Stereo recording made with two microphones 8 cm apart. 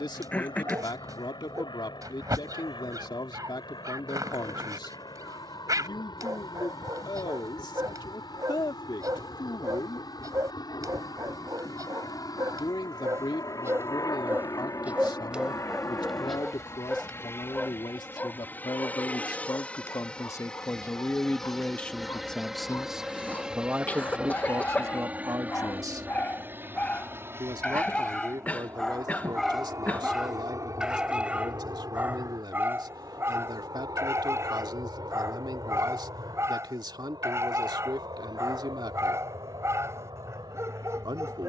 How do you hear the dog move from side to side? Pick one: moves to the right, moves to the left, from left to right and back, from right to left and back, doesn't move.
from right to left and back.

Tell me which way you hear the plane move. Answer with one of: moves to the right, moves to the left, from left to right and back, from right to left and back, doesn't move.
moves to the right.